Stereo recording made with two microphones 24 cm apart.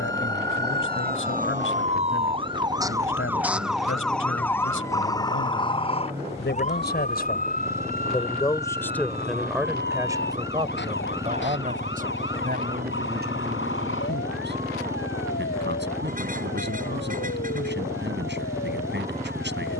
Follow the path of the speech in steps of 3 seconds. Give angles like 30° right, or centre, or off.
60° left, 60° left, 30° left, 20° right, 40° right, 50° right, 50° right.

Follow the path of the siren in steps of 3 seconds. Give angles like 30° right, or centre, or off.
30° right, 10° left, 30° left, 50° left, 50° left, 60° left, 60° left.